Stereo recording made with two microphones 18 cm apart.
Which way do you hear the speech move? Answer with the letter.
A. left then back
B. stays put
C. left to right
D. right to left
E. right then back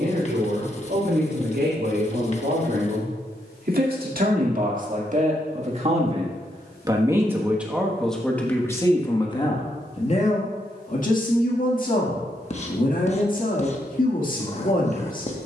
D.